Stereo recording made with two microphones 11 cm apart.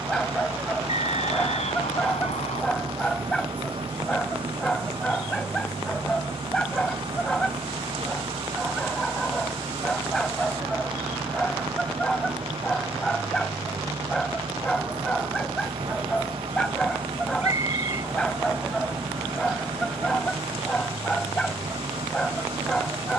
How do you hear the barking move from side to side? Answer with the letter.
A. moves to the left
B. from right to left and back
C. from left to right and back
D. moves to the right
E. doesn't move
E.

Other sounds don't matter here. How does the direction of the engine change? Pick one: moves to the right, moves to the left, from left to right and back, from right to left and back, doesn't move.
doesn't move.